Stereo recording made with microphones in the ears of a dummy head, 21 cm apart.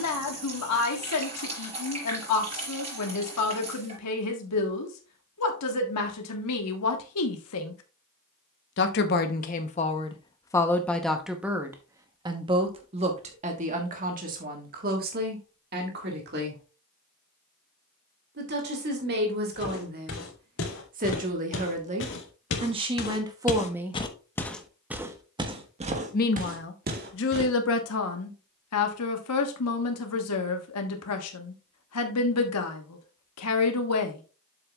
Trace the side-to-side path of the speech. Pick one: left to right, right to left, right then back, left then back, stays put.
right then back.